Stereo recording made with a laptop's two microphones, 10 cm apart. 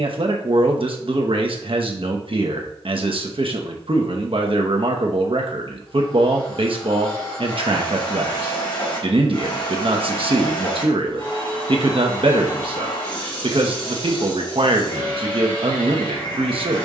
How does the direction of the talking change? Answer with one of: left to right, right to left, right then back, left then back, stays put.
stays put.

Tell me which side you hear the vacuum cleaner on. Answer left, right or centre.
left.